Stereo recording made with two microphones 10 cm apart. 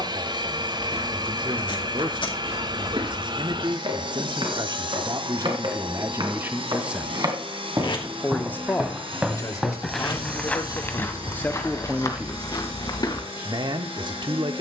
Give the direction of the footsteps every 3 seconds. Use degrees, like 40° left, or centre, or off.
70° right, 60° right, 40° right, 10° left, 50° left.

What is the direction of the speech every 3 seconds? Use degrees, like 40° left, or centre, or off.
50° right, 50° right, centre, 30° left, 40° right.